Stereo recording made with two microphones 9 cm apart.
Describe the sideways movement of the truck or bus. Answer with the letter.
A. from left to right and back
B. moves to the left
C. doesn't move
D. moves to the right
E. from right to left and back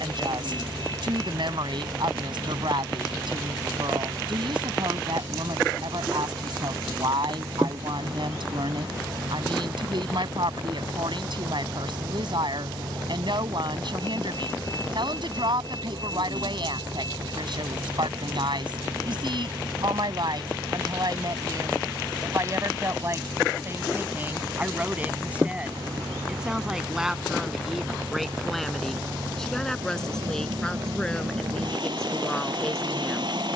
C.